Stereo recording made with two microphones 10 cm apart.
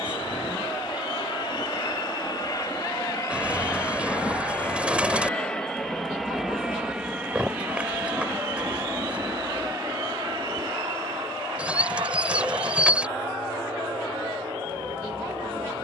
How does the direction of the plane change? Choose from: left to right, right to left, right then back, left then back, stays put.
left to right.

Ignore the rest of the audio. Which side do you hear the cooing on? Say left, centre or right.
centre.